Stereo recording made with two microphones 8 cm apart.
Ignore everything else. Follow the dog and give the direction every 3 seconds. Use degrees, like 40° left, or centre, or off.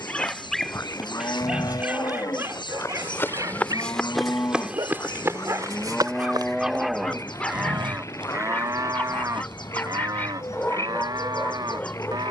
10° right, 50° right, centre, 20° left.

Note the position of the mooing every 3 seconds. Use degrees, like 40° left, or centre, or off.
60° left, 40° left, 20° right, 50° right.